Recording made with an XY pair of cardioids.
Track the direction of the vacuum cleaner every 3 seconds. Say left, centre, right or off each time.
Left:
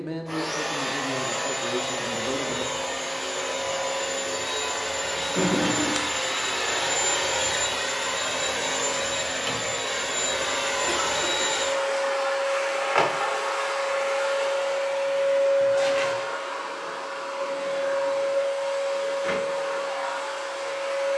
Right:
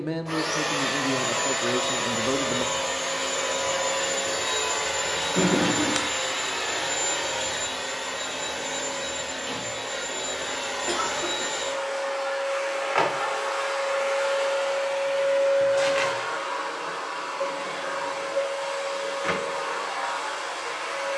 right, right, left, left, centre, right, right.